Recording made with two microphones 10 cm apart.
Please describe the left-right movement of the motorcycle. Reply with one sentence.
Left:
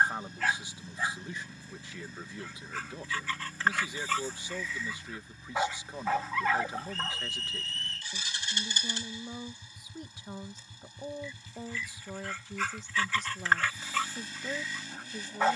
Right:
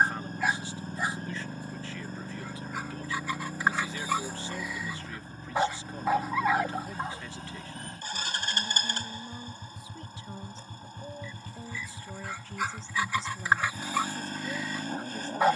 In this clip you hear the motorcycle stay put.